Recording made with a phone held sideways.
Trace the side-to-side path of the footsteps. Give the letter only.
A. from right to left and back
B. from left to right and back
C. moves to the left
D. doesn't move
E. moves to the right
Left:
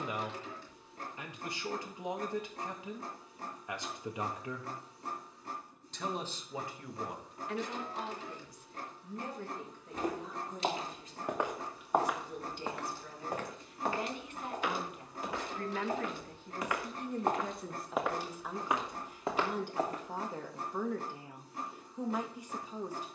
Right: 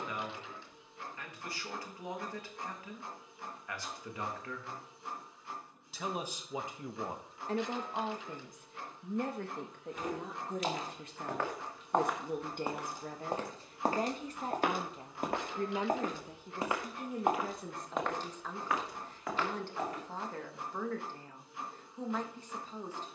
B.